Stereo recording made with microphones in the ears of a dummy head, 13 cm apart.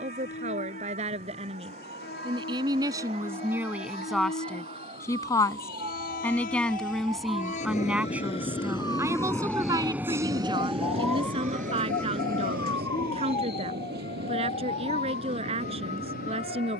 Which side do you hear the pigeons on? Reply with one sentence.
In this clip you hear the pigeons on the left.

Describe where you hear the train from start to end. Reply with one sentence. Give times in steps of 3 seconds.
You can hear the train on the left from 0 s and on the right from 9 s.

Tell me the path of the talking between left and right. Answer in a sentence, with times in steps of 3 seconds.
In this clip you hear the talking on the right from 0 s, in the centre from 3 s and on the right from 9 s.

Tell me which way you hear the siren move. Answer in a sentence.
In this clip you hear the siren travel towards the left.